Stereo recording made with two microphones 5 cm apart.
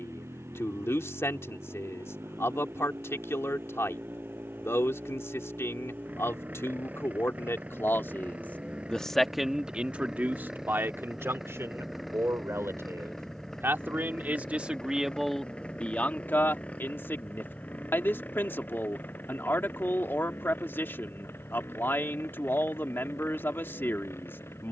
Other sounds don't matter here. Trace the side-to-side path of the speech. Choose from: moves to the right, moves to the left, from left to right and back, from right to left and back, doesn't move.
from left to right and back.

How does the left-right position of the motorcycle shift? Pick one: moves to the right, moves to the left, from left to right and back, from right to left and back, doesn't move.
moves to the left.